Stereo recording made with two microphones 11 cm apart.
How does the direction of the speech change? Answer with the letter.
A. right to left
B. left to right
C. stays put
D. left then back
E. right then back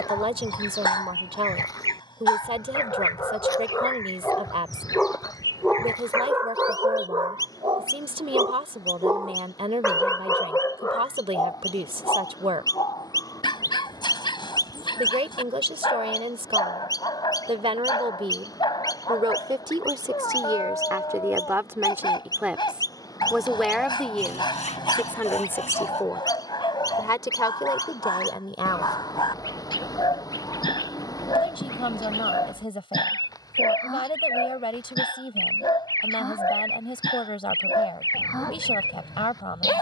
A.